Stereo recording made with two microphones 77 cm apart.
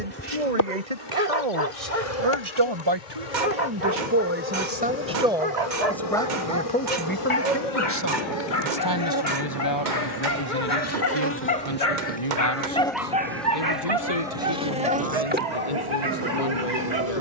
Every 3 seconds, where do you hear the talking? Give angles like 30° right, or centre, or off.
40° right, 10° right, 10° left, 30° left, 40° left, 50° left.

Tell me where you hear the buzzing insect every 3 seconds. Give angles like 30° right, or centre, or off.
30° left, 50° left, 40° left, 20° left, centre, 20° right.